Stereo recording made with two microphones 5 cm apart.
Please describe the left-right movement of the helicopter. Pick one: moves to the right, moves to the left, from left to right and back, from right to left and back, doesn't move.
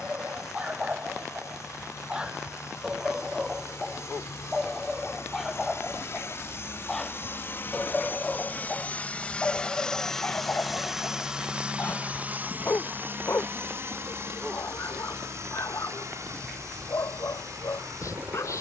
moves to the right.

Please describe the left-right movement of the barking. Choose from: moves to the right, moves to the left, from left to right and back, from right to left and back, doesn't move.
moves to the left.